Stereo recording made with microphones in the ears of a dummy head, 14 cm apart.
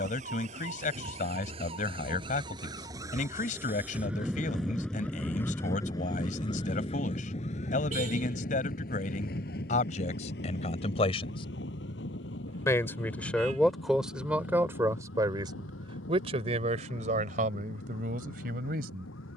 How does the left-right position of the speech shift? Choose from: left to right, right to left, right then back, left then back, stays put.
left to right.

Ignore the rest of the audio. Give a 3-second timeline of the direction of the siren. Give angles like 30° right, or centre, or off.
30° right, centre, 40° left, 60° left, 70° left, 80° left, 80° left.